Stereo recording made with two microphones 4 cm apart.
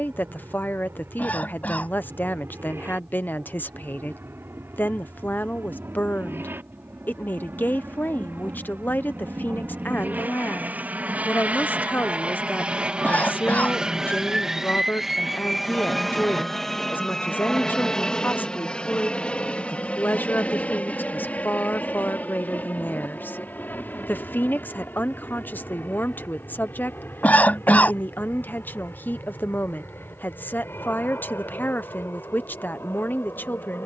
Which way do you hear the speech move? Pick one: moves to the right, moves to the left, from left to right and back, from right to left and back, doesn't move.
doesn't move.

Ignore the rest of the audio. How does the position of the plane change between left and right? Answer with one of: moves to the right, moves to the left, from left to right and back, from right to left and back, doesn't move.
moves to the left.